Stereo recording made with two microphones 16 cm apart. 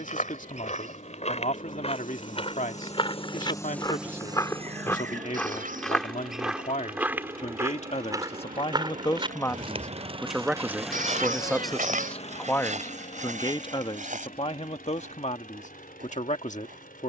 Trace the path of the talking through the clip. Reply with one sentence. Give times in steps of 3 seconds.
In this clip you hear the talking on the left from 0 s, in the centre from 9 s and on the left from 12 s.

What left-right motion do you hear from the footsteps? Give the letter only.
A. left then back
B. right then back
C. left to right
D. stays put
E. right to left
C.